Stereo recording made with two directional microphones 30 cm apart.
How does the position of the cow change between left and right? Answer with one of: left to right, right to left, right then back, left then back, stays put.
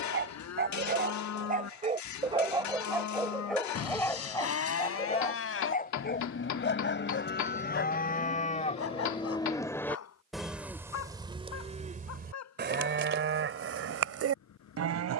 left to right.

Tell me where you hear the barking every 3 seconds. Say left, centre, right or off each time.
right, centre, left, left, left.